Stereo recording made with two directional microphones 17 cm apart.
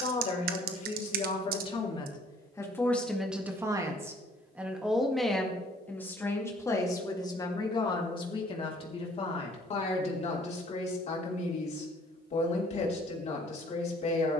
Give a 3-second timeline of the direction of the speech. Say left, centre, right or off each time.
left, centre, left, left, left.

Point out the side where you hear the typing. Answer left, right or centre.
right.